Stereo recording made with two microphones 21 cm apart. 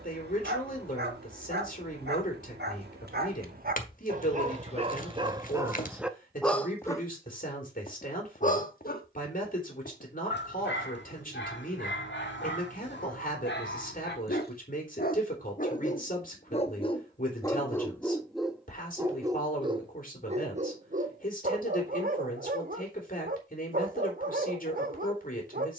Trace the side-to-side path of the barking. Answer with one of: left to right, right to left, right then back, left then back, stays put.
left then back.